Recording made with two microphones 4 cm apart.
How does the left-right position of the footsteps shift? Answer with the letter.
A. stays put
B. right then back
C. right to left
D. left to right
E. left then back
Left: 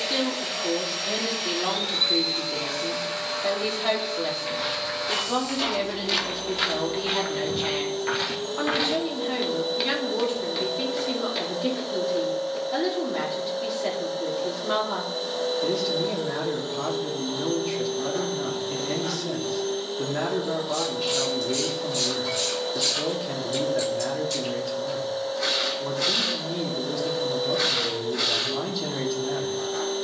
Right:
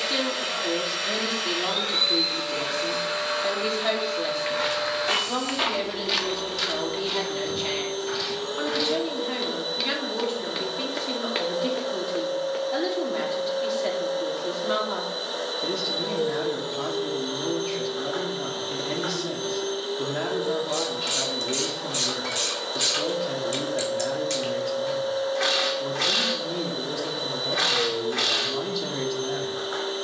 E.